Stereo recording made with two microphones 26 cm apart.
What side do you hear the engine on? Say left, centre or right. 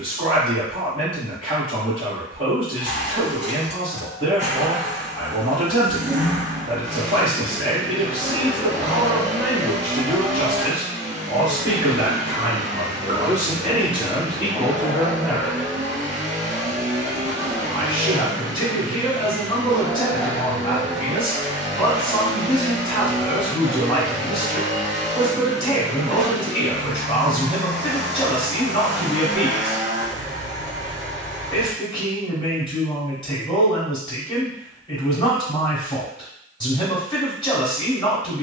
right.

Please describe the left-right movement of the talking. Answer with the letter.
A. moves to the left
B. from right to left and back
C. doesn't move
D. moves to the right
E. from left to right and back
A.